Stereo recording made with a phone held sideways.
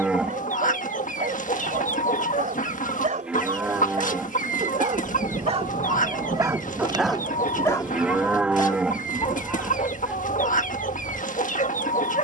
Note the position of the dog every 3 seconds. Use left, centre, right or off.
right, right, centre, left.